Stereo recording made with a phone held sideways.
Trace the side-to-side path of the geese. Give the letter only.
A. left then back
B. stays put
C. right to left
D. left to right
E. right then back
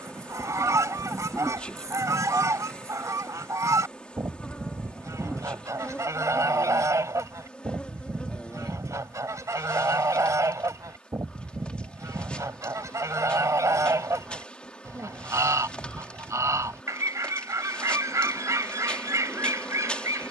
B.